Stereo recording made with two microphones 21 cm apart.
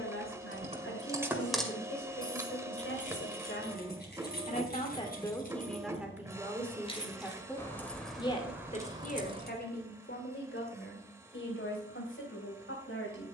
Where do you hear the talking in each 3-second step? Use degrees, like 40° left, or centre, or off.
80° left, 30° left, 10° left, 60° left, 80° left.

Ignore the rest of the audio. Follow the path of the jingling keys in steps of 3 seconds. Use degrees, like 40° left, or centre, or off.
centre, 50° left, 10° left, 20° right, off.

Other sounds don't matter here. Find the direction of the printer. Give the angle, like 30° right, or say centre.
10° right.